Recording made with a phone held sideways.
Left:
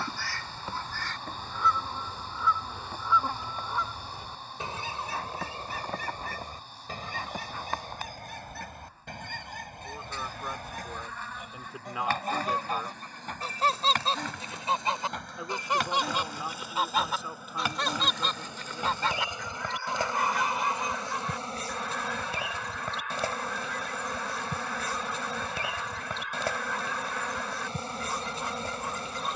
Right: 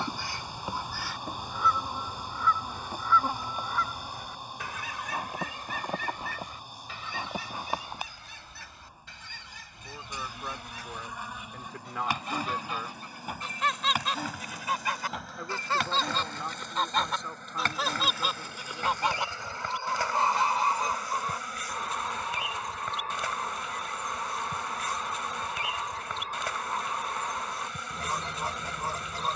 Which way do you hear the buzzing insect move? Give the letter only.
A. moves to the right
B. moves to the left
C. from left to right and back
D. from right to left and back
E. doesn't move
B.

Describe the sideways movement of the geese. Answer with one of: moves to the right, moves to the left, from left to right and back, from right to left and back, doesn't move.
from right to left and back.